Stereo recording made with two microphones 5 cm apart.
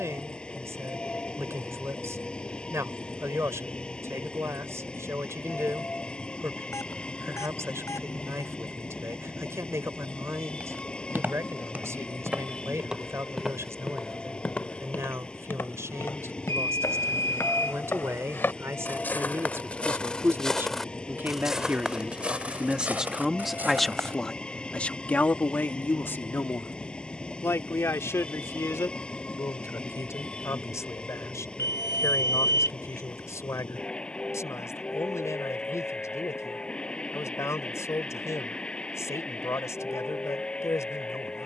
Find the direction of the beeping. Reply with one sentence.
In this clip you hear the beeping on the left.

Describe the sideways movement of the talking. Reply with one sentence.
In this clip you hear the talking go from the right side to the left.